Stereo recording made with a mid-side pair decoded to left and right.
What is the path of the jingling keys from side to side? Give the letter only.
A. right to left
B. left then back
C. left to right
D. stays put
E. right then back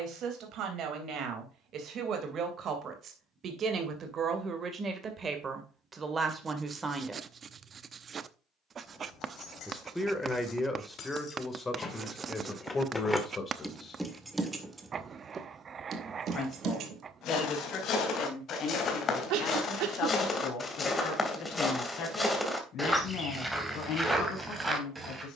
C.